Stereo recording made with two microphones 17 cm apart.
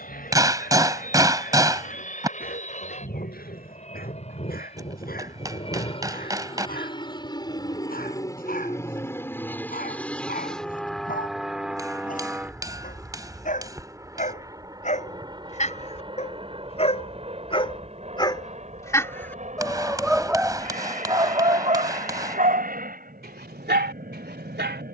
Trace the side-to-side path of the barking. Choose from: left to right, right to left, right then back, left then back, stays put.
left to right.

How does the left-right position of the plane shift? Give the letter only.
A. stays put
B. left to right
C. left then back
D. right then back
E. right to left
B.